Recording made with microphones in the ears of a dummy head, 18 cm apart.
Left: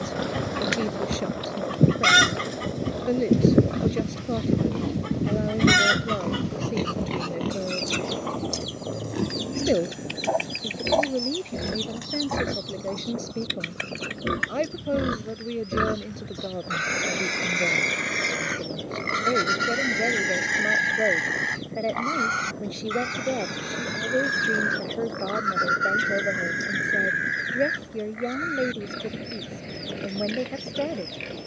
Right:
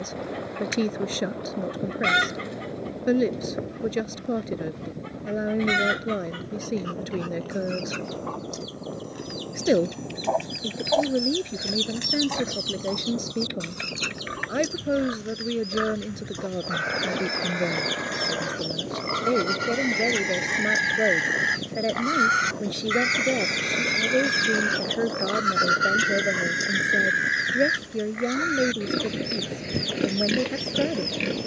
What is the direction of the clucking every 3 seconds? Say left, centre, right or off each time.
left, left, left, centre, right, right, right, right, right, right, right.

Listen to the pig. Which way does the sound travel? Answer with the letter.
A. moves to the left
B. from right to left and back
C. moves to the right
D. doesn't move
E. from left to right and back
C.